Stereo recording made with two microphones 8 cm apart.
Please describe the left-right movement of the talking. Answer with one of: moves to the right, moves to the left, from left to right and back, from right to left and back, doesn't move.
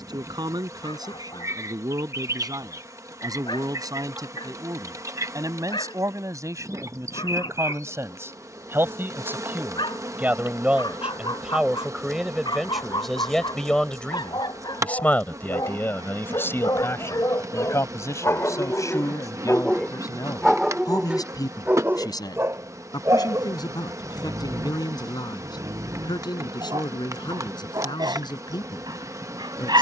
moves to the left.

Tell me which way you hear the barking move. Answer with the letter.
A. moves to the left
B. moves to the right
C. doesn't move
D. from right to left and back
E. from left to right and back
B.